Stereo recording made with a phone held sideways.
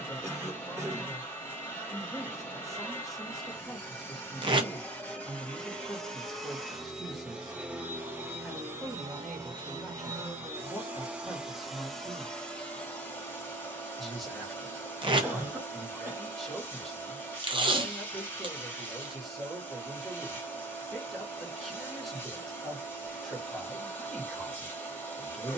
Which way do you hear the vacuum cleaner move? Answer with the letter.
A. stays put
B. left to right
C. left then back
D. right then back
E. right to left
D.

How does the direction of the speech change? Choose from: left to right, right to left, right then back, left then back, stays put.
stays put.